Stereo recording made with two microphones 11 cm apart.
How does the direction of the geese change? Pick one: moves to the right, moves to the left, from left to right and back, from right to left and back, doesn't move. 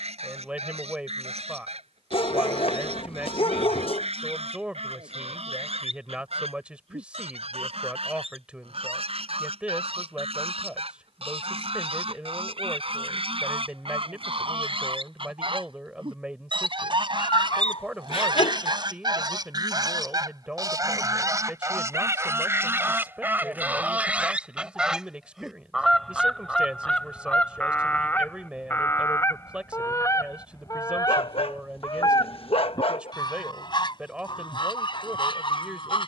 moves to the left.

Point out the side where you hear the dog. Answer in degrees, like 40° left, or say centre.
60° left.